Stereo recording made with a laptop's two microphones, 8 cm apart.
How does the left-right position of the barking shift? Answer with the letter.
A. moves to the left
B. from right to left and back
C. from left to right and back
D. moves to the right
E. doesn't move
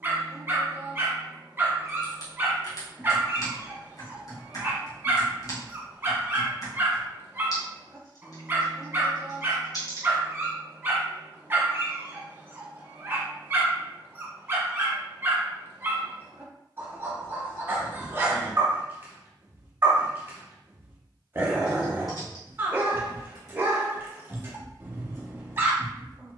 E.